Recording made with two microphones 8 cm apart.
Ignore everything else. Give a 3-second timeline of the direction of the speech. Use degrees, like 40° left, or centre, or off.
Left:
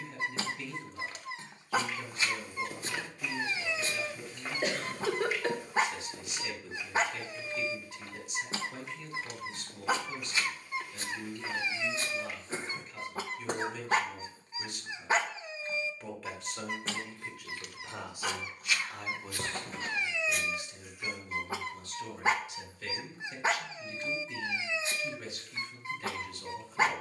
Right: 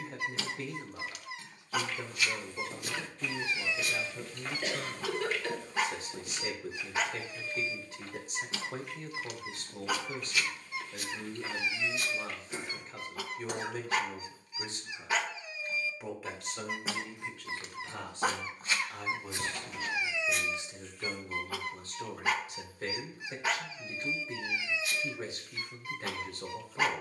40° right, 40° right, 40° right, 40° right, 40° right, centre, 10° right, 40° right, 40° right.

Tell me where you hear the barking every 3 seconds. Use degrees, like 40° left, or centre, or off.
30° left, 30° left, 30° left, 30° left, 30° left, centre, 10° right, 30° left, 30° left.